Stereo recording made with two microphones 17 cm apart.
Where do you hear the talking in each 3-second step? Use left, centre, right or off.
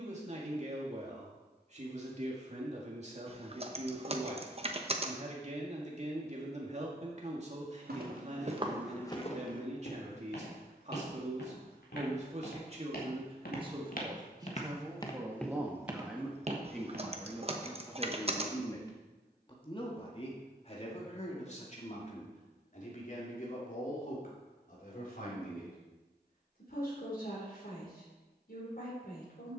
right, right, right, right, right, centre, left, left, left, left.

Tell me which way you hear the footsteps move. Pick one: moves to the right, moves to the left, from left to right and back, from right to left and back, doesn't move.
from right to left and back.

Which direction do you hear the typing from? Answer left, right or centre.
right.